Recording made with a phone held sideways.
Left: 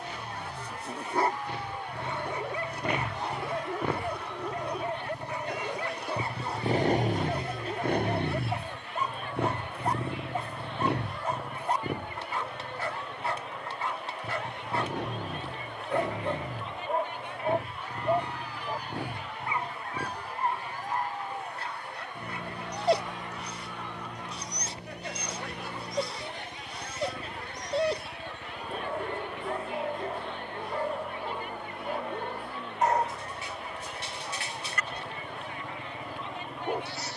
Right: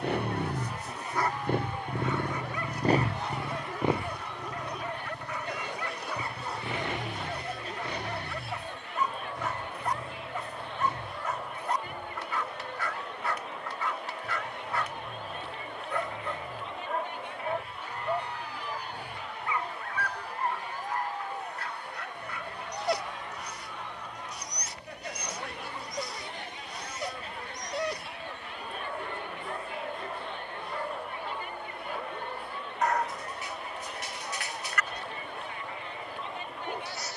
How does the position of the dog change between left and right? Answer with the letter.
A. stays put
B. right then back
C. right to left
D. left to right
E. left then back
A.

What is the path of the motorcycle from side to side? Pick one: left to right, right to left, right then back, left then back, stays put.
right to left.